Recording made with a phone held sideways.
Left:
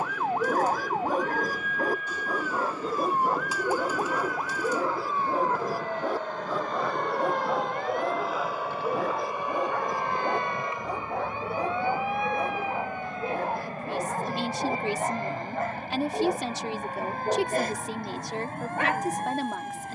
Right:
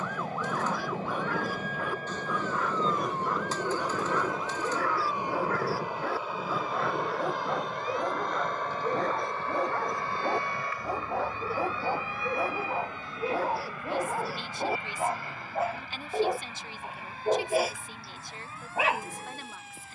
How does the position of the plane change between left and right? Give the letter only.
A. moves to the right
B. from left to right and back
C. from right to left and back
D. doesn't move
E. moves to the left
E.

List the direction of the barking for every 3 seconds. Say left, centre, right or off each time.
left, left, centre, centre, centre, centre, centre.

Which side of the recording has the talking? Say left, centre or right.
left.